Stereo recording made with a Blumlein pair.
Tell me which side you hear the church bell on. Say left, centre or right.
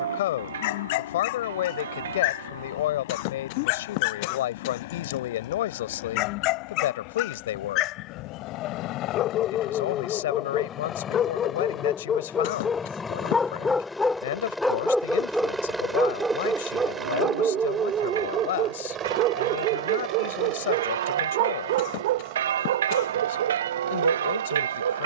right.